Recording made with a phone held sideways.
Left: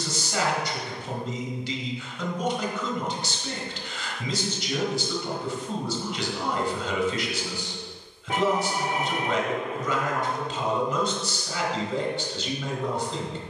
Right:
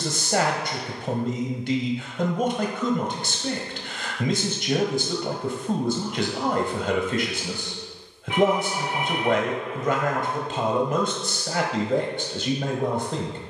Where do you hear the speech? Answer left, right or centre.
right.